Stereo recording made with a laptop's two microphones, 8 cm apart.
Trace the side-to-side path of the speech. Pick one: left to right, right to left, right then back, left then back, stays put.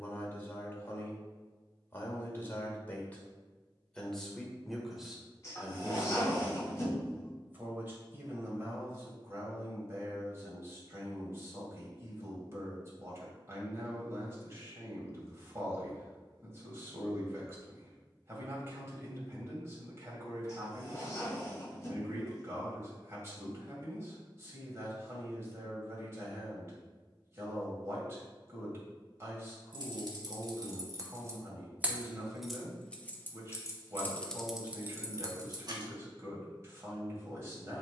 left to right.